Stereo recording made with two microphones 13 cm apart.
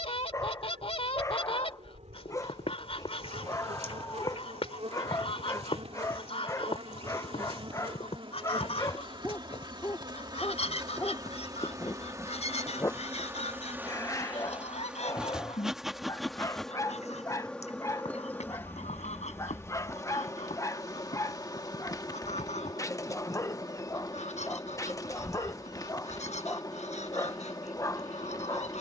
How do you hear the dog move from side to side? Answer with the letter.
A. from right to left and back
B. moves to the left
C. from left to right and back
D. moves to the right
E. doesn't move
E.